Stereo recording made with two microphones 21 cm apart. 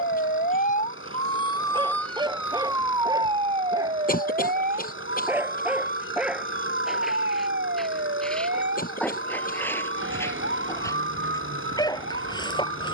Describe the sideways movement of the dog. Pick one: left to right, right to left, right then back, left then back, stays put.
right to left.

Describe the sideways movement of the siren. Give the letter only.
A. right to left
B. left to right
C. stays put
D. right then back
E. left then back
B.